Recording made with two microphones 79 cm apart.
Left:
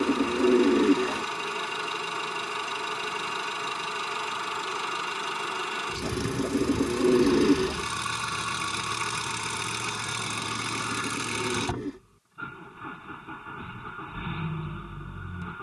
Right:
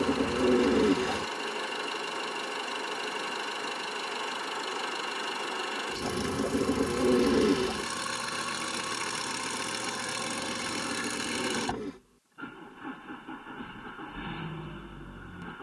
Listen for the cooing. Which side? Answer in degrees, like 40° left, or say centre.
20° right.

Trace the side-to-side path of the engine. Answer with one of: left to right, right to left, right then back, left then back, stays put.
stays put.